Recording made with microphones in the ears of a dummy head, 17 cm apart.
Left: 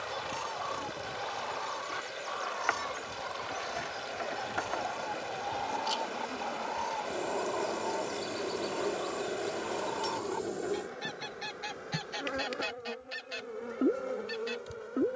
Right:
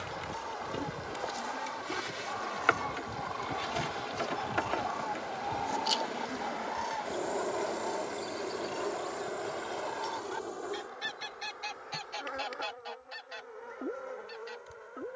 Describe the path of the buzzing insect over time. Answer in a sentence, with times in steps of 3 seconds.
In this clip you hear the buzzing insect on the right from 0 s, in the centre from 6 s and on the left from 9 s.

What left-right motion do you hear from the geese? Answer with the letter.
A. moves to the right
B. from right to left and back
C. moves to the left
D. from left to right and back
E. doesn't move
D.